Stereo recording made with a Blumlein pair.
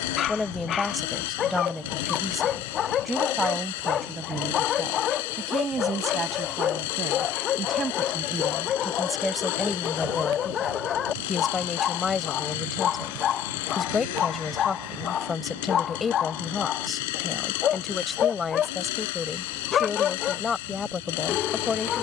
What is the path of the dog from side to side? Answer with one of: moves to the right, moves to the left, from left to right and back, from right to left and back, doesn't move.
doesn't move.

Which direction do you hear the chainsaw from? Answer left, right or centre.
left.